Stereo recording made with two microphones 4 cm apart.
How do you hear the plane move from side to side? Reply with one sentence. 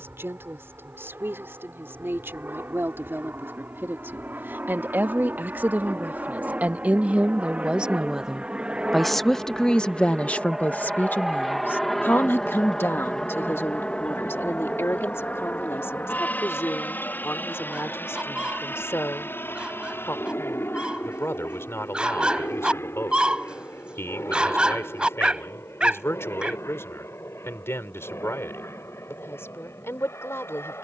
In this clip you hear the plane travel towards the left.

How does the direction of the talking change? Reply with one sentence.
You can hear the talking move from right to left.